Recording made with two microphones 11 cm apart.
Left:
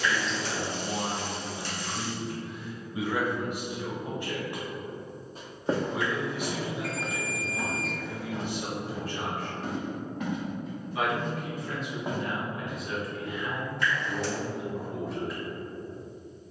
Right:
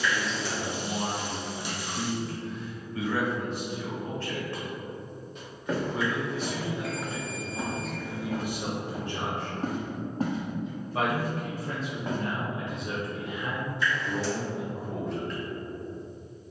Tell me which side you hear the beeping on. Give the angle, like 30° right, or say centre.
60° left.